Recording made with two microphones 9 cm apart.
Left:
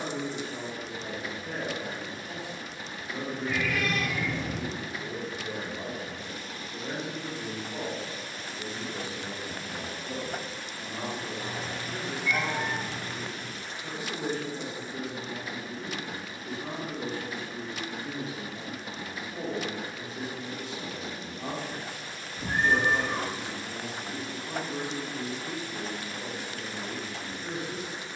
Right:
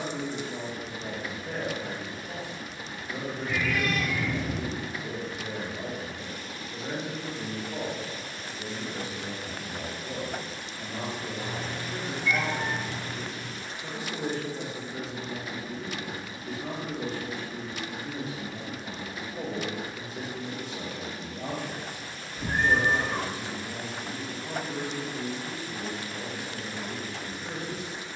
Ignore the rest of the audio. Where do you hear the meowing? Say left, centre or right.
right.